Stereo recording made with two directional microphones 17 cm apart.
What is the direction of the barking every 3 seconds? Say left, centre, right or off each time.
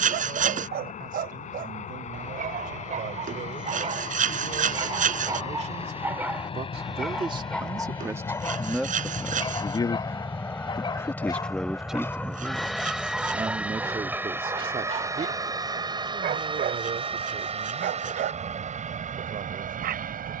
right, right, centre, left, centre, right, right.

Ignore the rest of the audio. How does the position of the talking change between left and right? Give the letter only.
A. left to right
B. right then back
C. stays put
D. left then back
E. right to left
D.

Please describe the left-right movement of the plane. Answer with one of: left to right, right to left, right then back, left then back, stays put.
left to right.